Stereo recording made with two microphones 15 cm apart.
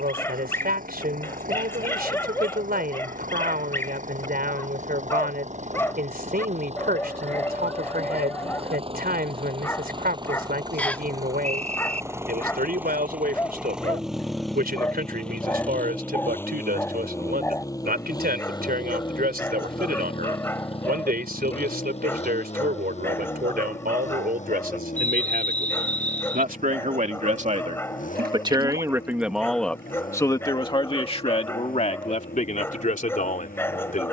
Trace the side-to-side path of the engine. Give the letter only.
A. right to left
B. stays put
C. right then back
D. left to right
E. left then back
A.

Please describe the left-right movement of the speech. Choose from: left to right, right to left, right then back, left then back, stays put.
right to left.